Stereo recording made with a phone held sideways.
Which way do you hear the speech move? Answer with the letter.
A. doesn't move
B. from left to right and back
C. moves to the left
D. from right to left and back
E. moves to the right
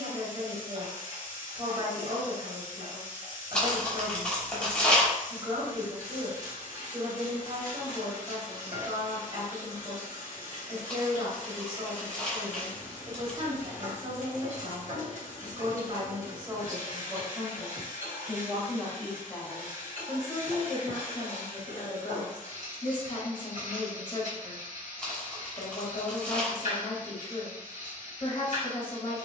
C.